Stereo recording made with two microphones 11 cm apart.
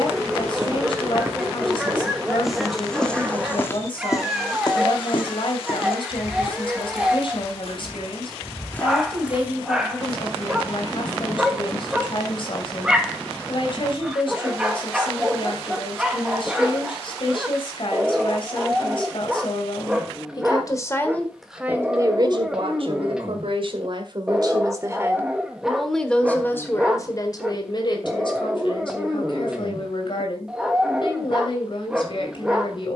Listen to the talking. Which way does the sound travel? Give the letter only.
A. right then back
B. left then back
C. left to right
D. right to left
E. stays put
A.